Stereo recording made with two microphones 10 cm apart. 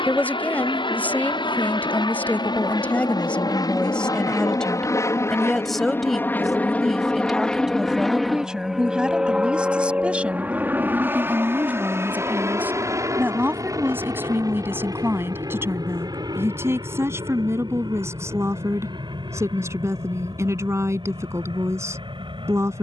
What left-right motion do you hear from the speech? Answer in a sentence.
In this clip you hear the speech travel towards the right.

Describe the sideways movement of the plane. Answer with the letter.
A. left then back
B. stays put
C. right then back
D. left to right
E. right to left
D.